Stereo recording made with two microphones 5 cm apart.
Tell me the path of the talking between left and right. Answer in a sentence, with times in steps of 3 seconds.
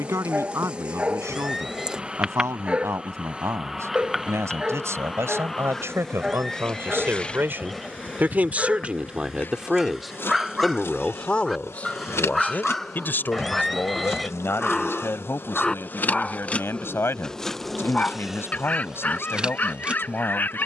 You can hear the talking on the right from 0 s, in the centre from 9 s and on the left from 12 s.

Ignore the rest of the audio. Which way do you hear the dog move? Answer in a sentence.
You can hear the dog go from the right side to the left.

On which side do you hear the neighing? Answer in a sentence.
You can hear the neighing in the centre.